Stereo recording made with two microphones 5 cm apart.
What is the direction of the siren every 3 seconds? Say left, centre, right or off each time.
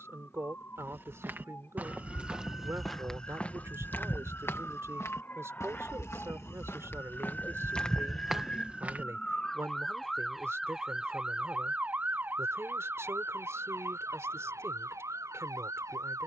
left, left, left, centre, right, right.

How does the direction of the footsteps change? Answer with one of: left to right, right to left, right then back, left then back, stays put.
left then back.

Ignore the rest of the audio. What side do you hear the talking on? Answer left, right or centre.
right.